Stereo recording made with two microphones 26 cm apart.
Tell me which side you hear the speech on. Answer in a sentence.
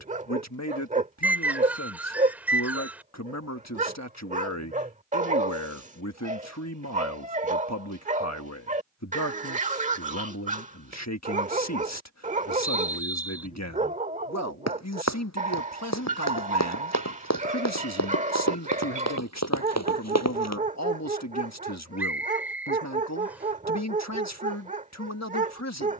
You can hear the speech on the left.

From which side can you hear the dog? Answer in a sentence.
In this clip you hear the dog on the right.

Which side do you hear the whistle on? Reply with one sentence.
You can hear the whistle in the centre.